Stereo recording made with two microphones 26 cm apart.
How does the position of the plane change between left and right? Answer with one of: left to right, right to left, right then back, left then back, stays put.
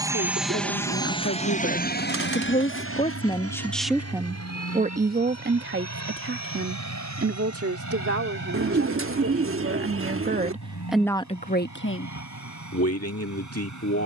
right to left.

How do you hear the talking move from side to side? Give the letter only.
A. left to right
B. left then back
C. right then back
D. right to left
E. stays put
C.